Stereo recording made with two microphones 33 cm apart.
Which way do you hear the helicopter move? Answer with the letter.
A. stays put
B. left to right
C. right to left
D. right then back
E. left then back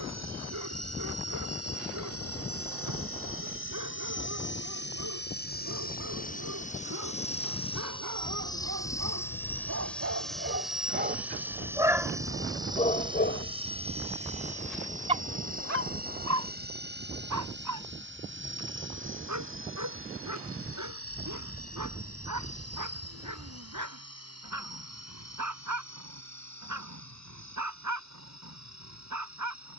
B.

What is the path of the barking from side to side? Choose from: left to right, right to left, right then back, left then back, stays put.
left then back.